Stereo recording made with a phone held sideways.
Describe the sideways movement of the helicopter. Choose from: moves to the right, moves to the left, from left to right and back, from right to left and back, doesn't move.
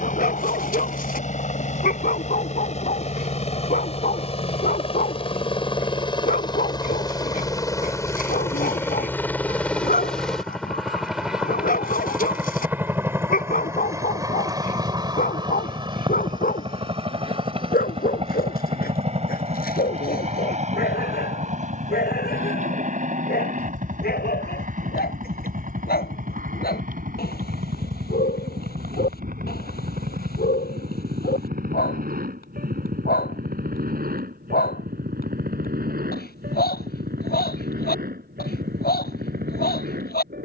moves to the right.